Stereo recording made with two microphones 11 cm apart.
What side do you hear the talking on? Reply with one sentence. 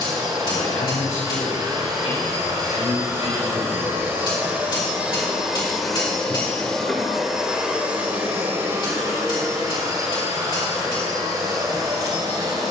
In this clip you hear the talking on the left.